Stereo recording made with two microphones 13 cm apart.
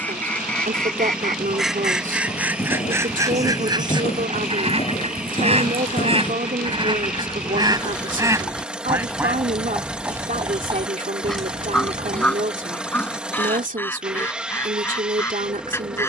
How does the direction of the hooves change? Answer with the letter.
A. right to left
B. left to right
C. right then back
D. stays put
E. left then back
B.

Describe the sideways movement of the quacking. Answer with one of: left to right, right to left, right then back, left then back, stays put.
right then back.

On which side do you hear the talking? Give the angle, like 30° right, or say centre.
80° right.